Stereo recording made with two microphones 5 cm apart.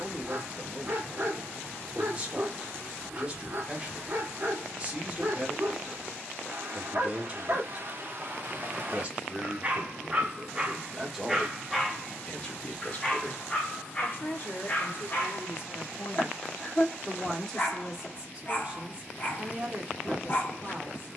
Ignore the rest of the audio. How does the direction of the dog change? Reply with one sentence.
You can hear the dog travel towards the left.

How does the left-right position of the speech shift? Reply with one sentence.
You can hear the speech move from right to left and back again.